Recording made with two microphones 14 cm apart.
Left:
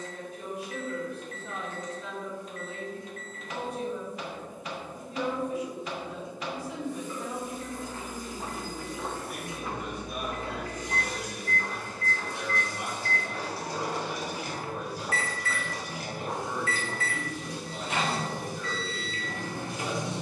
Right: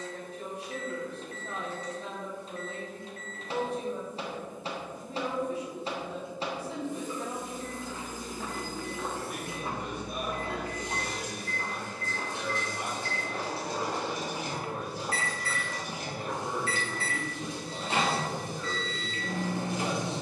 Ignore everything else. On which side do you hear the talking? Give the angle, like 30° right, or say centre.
40° right.